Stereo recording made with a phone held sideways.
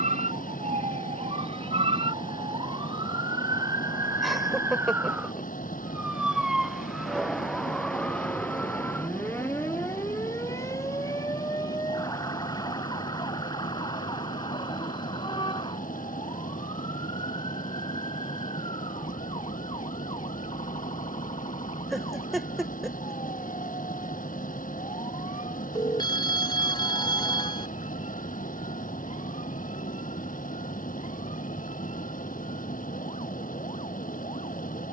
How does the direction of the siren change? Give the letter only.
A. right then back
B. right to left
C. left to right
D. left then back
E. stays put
B.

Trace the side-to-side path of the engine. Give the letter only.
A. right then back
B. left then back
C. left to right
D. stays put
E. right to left
D.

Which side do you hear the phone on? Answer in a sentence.
You can hear the phone on the left.